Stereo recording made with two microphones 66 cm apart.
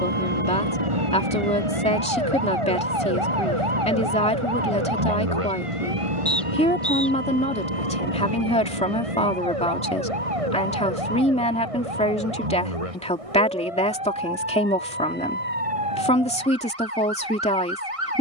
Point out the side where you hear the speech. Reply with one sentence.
You can hear the speech in the centre.